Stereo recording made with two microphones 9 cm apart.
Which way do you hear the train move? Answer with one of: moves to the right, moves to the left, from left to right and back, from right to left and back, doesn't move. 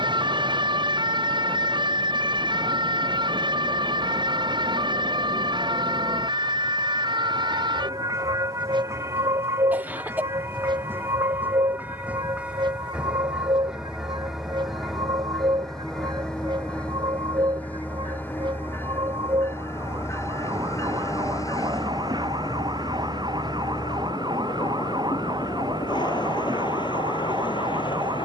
moves to the left.